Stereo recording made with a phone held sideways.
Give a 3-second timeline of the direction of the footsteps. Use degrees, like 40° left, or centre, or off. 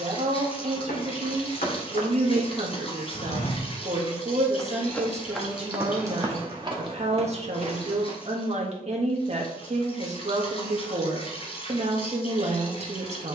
70° left, 20° left, 40° right, off, off.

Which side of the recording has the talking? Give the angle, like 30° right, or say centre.
40° right.